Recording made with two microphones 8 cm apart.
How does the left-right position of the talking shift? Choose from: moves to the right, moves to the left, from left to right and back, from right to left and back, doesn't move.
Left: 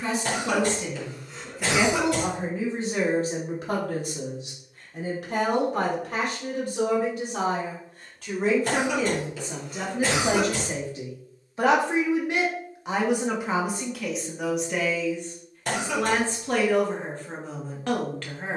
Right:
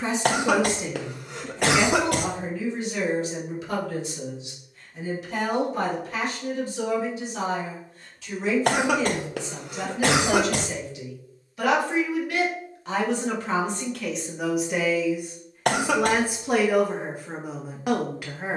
from right to left and back.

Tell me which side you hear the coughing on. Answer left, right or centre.
right.